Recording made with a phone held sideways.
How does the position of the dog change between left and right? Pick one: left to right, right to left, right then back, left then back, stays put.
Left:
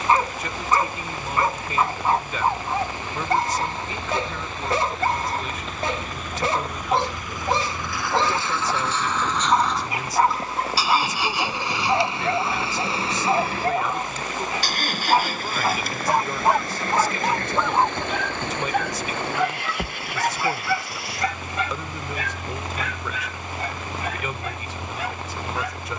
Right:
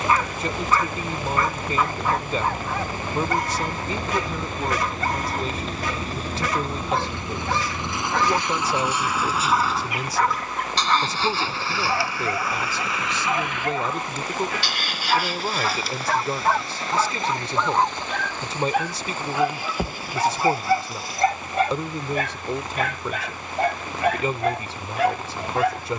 left to right.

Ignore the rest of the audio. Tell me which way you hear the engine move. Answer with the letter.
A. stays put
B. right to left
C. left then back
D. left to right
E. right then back
B.